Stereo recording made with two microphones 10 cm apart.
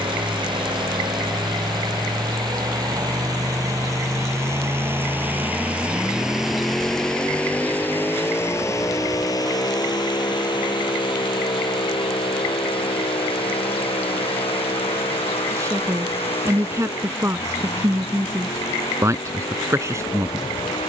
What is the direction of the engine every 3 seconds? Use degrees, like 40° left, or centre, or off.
50° right, 30° right, 10° left, 50° left, 70° left, 70° left, 80° left.